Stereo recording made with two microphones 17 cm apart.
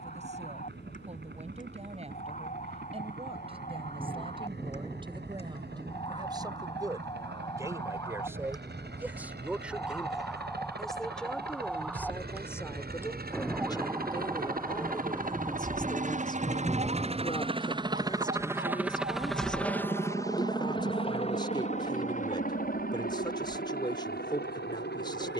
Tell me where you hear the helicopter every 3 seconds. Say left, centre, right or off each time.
right, right, right, right, right, right, centre, left, left.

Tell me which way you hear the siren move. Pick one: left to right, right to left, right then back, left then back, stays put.
left to right.